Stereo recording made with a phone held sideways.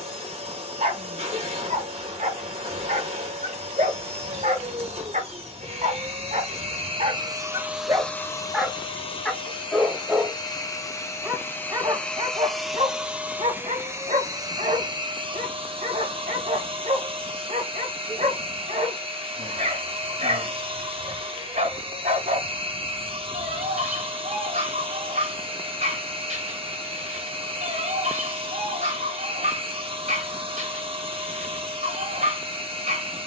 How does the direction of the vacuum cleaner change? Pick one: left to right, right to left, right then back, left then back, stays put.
left then back.